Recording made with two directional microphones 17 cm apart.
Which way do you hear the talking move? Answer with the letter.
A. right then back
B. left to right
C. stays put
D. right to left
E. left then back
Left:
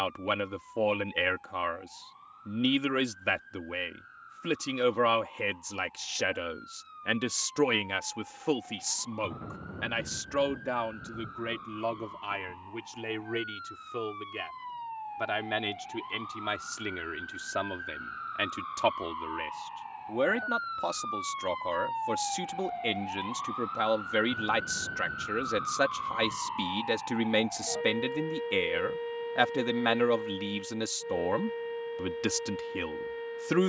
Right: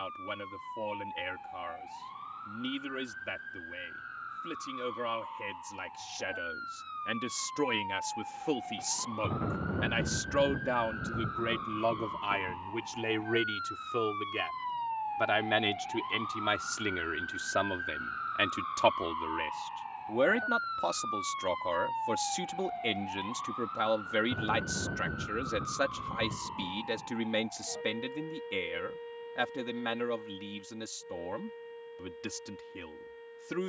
A.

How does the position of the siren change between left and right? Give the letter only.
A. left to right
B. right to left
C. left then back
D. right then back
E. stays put
B.